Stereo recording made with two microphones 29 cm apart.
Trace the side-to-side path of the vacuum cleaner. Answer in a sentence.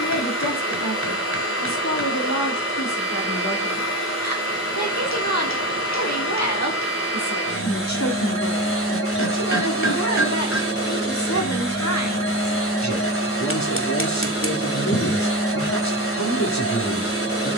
You can hear the vacuum cleaner stay in one place.